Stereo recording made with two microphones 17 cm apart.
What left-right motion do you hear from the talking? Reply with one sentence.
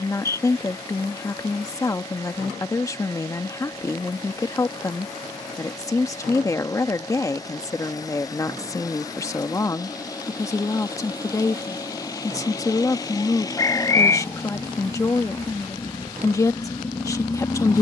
You can hear the talking stay in one place.